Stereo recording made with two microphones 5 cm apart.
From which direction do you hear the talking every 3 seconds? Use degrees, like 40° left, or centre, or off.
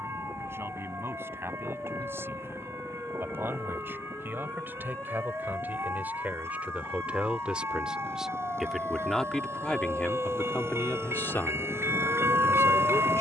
50° right, 40° right, 20° right, 30° left, 70° left.